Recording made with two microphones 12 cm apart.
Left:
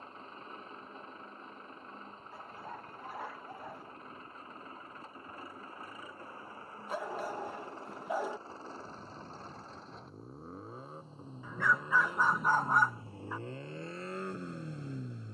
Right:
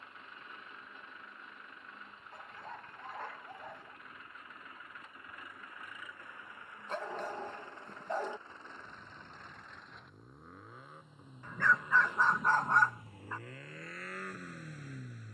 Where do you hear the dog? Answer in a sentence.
You can hear the dog in the centre.